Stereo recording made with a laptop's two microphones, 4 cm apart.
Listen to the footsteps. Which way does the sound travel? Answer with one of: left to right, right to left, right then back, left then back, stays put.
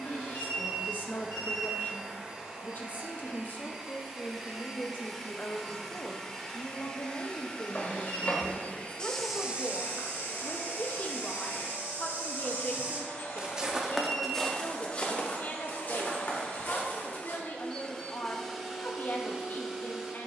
right then back.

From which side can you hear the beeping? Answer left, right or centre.
left.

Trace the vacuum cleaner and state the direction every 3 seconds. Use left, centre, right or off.
right, centre, left, left, left, left, centre.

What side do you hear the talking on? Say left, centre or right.
left.